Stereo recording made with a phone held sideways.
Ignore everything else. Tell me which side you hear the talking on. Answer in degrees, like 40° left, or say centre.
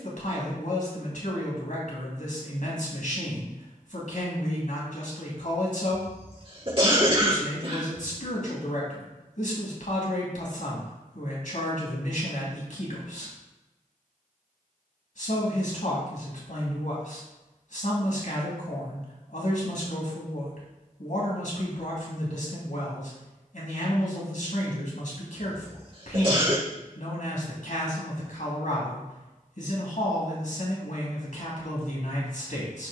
60° left.